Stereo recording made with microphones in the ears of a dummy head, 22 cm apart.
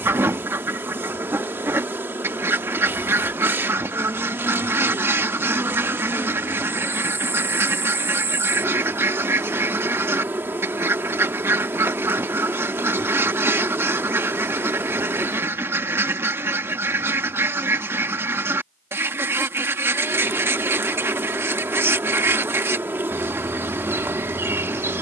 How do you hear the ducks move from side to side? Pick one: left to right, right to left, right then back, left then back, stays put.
stays put.